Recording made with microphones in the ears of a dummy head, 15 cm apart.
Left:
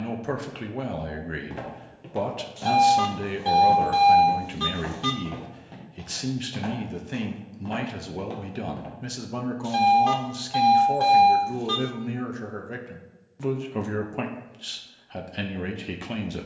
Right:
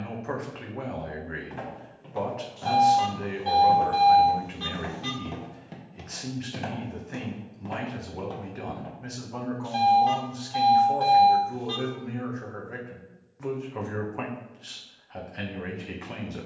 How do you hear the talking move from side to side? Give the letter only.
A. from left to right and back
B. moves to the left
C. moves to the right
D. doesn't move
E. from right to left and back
D.